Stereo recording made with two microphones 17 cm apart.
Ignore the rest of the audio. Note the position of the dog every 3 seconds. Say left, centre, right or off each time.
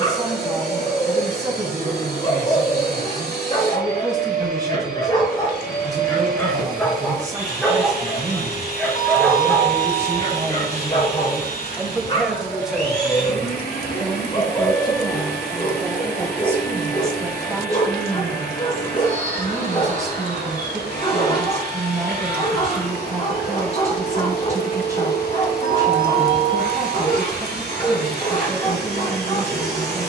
left, left, centre, left, left, left, left, left, left, left.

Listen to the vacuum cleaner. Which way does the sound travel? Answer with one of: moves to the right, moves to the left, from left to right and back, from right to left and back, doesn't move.
doesn't move.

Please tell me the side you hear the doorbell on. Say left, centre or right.
left.